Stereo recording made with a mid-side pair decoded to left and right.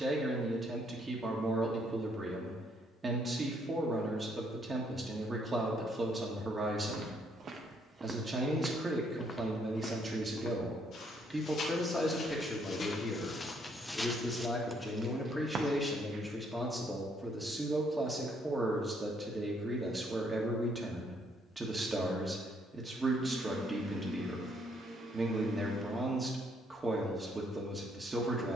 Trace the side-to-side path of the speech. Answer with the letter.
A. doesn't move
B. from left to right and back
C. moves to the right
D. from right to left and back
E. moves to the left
D.